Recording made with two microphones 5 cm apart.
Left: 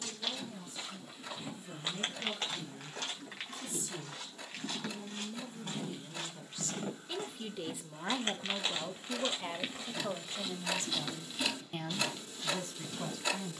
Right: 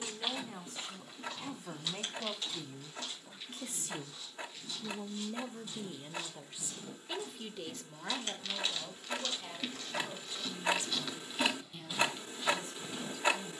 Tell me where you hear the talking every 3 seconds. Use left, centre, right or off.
right, right, centre, left, left.